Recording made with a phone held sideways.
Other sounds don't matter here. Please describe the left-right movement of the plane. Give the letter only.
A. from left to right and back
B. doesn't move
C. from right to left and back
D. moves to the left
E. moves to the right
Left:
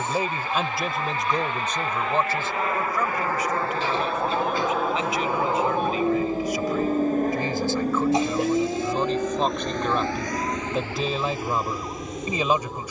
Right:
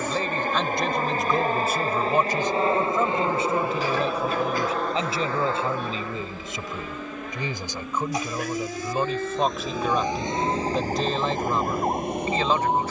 D.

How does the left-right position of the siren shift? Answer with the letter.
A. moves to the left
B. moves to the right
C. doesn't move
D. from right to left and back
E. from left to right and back
B.